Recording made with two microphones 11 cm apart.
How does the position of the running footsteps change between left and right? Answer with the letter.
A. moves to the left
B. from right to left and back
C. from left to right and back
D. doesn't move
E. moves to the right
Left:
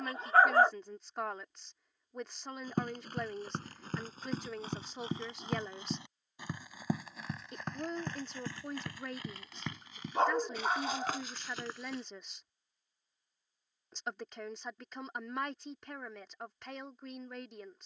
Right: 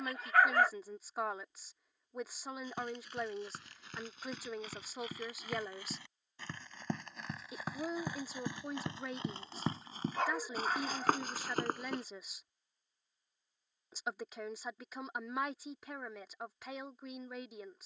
E.